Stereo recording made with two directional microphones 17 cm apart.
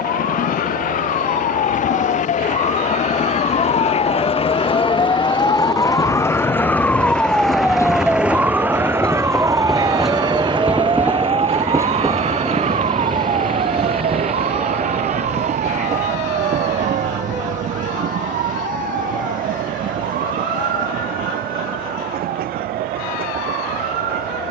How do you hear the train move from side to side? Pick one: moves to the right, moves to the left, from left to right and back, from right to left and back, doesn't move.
moves to the right.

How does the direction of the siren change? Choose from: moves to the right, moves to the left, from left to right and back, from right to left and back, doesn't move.
moves to the right.